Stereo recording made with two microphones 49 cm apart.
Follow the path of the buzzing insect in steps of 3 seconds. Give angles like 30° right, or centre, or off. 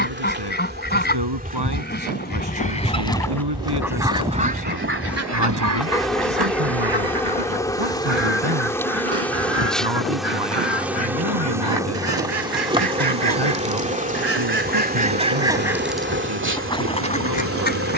20° right, centre, centre, centre, 10° right, 20° right.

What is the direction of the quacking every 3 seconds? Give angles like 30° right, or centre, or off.
20° left, 20° right, 60° right, 70° right, 40° right, 10° left.